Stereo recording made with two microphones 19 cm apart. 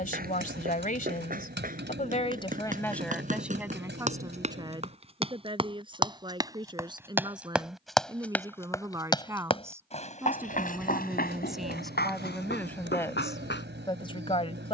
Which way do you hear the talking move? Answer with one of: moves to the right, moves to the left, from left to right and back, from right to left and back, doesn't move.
from left to right and back.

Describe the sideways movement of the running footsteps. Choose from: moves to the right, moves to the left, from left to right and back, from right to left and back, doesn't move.
moves to the left.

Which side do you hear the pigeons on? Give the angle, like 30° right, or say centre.
80° right.